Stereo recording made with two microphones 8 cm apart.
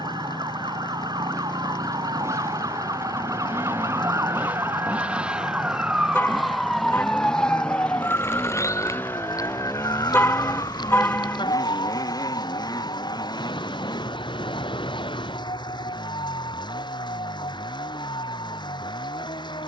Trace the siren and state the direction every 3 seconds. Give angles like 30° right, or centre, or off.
60° right, 30° right, 20° left, 50° left, 70° left, 80° left, 80° left.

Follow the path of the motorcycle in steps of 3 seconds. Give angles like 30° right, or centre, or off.
40° right, 20° right, 10° left, 40° left, 50° left, 60° left, 70° left.